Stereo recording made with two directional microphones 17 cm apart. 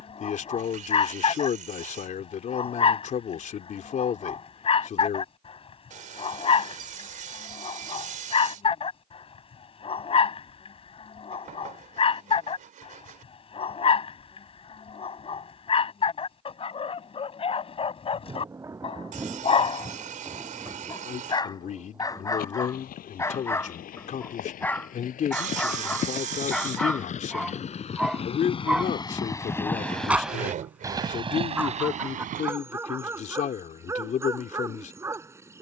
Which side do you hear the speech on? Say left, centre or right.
left.